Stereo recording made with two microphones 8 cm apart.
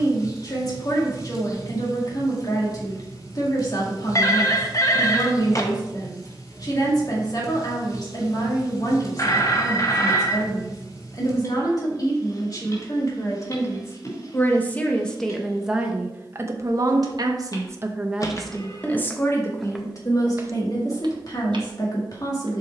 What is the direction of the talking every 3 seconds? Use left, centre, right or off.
left, left, left, left, left, right, left, left.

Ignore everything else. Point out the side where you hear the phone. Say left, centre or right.
left.